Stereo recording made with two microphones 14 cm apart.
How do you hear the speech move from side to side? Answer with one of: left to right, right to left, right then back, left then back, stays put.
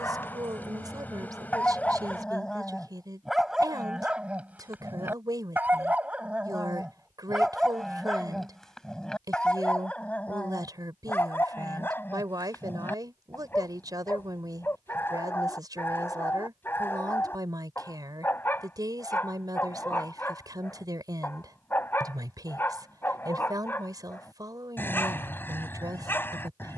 stays put.